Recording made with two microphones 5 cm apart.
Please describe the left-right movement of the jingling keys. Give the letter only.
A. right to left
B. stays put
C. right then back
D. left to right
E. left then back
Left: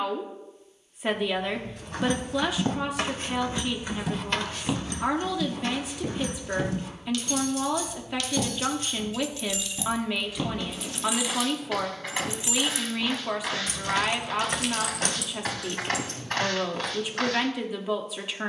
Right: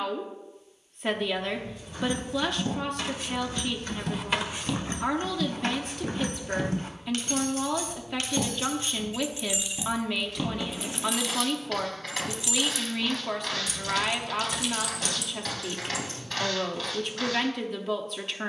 C.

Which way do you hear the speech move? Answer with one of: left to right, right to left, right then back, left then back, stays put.
stays put.